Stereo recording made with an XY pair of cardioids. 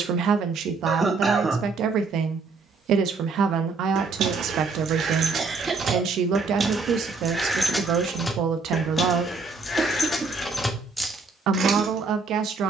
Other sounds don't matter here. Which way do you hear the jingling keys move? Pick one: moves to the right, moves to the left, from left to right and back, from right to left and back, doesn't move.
from right to left and back.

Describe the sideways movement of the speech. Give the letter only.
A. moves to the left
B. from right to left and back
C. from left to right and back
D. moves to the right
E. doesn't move
E.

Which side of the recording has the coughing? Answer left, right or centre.
right.